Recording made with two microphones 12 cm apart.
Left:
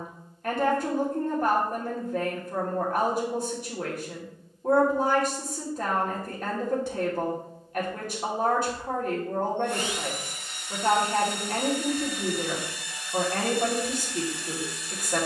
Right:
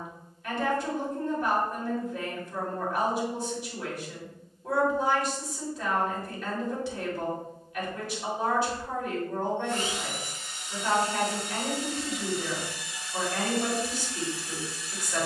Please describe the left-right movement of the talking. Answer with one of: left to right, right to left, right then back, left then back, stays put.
stays put.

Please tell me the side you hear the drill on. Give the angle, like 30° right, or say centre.
80° left.